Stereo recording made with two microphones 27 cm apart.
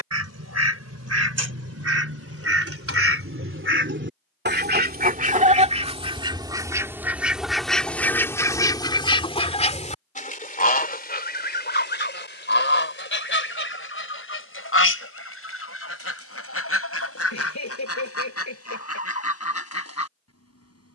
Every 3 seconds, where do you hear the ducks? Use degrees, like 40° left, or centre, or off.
60° right, 40° right, centre, 30° left, 50° left, 60° left, 60° left.